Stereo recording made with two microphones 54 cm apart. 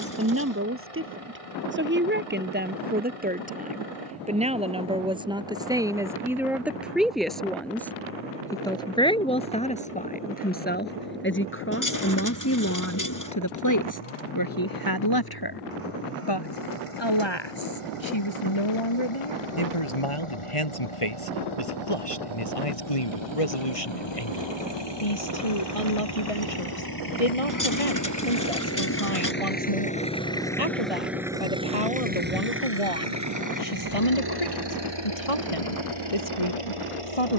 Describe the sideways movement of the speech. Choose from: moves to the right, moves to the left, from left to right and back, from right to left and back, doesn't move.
moves to the left.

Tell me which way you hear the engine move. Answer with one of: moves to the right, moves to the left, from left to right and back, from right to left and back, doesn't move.
moves to the right.